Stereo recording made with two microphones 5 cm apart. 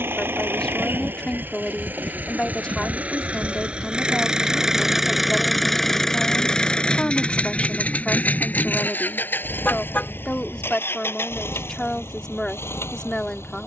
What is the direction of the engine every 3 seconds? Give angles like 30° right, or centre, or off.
40° right, 10° right, 30° left, 50° left, 60° left.